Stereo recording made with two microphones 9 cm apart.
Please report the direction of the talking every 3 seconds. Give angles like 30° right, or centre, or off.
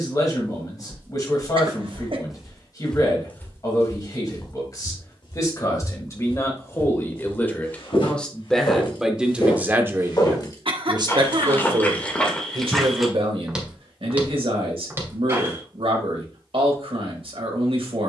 40° left, 40° left, 20° left, 40° right, 80° right, 80° right.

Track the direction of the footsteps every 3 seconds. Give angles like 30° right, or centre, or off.
10° right, 40° left, 70° left, 40° left, centre, 30° right.